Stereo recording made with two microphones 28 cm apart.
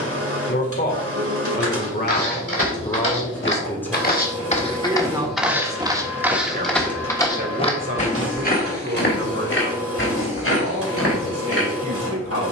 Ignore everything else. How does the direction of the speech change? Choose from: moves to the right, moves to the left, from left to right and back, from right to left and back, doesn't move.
moves to the right.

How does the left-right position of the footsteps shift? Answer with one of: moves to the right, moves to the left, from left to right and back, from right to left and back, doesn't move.
from left to right and back.